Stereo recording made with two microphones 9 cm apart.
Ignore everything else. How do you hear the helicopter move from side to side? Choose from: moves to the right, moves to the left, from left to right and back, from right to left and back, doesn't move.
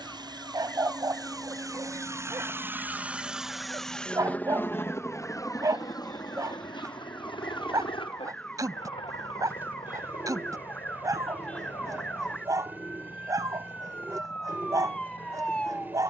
moves to the left.